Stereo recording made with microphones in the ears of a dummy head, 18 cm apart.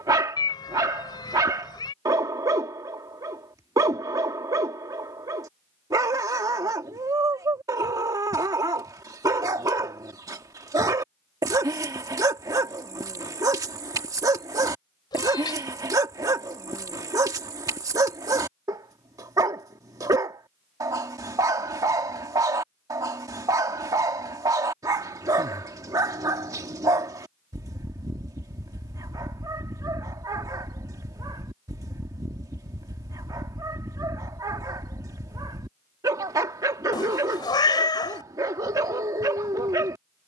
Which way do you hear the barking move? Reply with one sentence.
You can hear the barking stay in one place.